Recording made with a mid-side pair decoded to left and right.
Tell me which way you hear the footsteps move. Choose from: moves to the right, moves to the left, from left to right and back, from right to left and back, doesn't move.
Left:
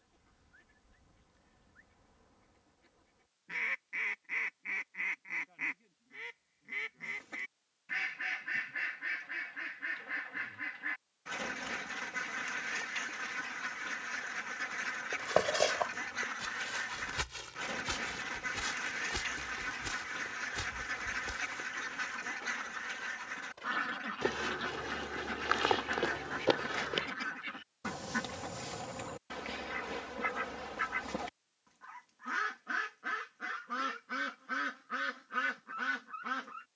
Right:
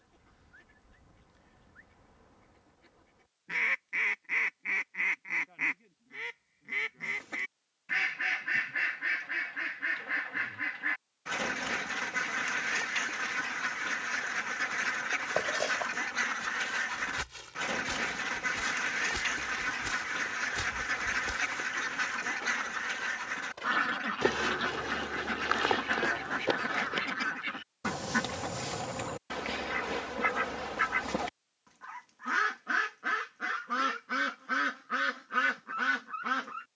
from left to right and back.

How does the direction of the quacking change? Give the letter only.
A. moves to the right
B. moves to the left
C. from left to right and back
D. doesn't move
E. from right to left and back
D.